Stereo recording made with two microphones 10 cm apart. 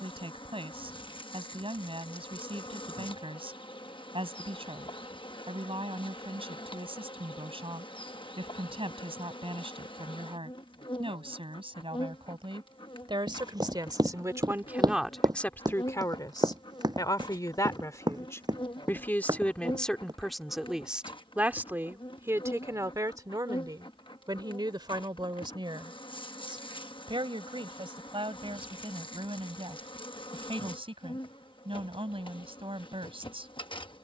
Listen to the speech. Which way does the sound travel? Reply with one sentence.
In this clip you hear the speech go left and come back.